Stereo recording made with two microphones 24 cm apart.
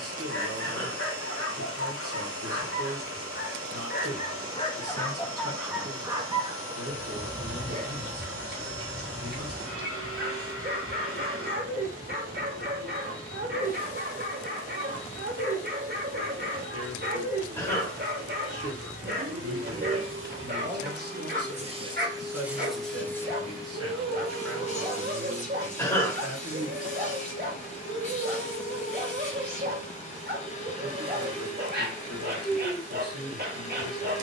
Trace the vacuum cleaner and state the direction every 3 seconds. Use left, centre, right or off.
right, right, right, right, right, right, right, centre, left, left, left, left.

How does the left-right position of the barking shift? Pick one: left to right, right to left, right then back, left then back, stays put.
left to right.